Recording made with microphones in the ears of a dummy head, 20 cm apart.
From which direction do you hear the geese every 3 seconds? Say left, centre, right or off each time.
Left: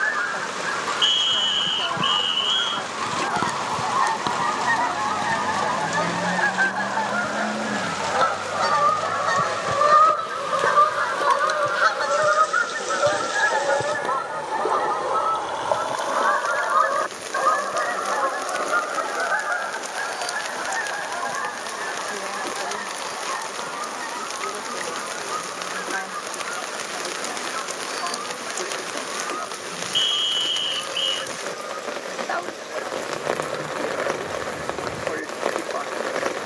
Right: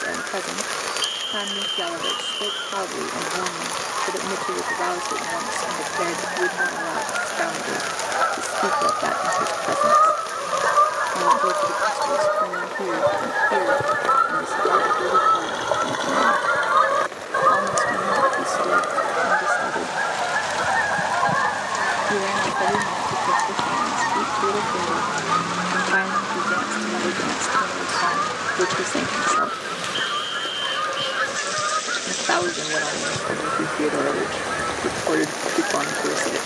left, left, left, left, centre, right, right, right, right, right, right, right.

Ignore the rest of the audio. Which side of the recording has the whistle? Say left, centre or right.
left.